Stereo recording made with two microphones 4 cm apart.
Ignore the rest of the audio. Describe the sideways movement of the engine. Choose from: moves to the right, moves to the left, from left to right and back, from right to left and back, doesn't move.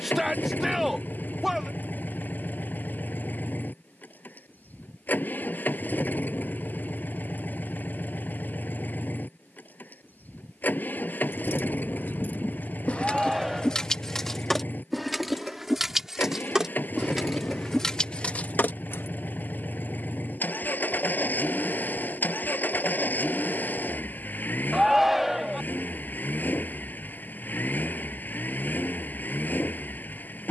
doesn't move.